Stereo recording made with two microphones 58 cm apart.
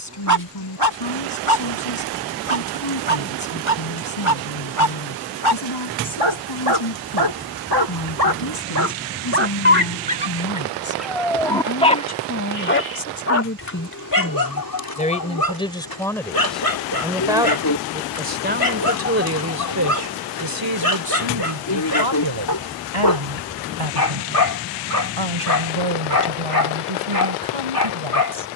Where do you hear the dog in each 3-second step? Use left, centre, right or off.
right, right, right, centre, left, left, left, left, left, left.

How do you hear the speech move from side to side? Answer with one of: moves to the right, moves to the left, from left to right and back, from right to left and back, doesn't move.
moves to the right.